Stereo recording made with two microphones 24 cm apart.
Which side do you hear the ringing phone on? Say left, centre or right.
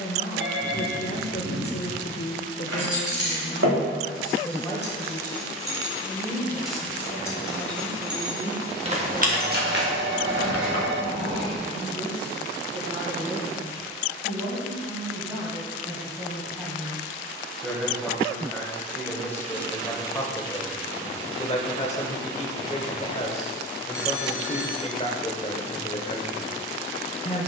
right.